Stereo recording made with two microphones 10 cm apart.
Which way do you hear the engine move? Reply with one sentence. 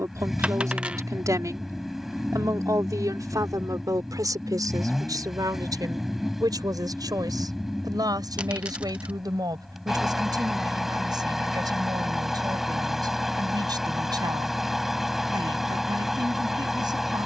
You can hear the engine stay put.